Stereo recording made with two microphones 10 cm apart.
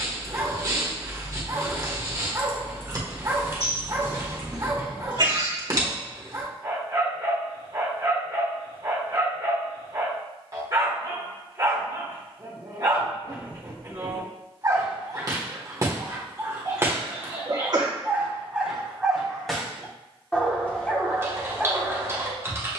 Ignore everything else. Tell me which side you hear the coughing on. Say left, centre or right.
right.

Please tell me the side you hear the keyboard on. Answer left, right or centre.
right.